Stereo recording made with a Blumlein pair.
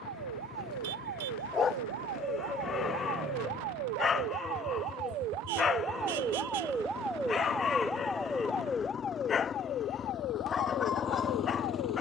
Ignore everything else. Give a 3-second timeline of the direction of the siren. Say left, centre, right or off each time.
right, right, centre, left.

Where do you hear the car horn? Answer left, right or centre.
right.